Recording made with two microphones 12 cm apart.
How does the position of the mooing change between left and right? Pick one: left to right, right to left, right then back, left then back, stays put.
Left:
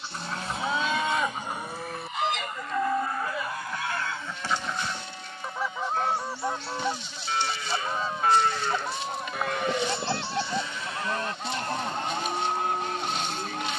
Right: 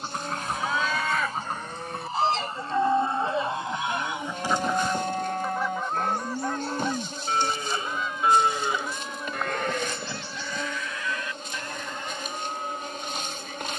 right then back.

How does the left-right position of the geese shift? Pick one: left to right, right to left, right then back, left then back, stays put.
right to left.